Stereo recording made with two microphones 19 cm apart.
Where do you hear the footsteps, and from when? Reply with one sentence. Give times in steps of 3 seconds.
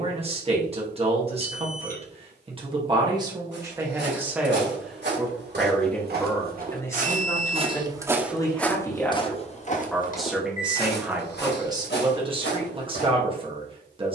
You can hear the footsteps not at all from 0 s, on the right from 3 s and on the left from 9 s.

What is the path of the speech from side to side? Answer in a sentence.
In this clip you hear the speech go left and come back.